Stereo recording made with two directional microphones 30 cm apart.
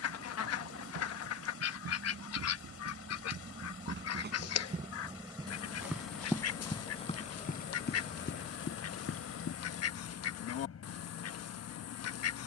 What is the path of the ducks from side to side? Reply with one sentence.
In this clip you hear the ducks stay put.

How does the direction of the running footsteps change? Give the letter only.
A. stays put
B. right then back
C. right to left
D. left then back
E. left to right
C.